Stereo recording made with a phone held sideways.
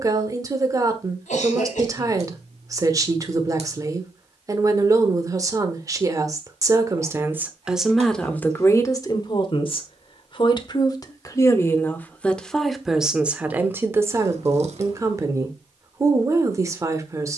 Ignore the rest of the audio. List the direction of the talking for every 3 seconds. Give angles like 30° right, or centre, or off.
30° right, 30° right, 10° right, 30° left, 10° right, 20° right.